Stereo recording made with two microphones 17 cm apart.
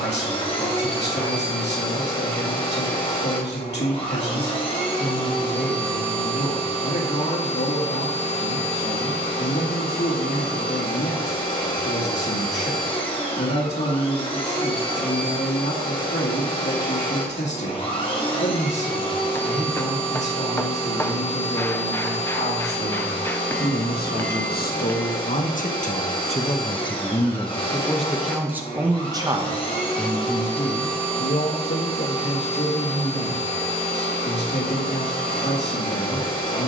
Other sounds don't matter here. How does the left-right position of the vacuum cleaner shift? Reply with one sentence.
You can hear the vacuum cleaner stay in one place.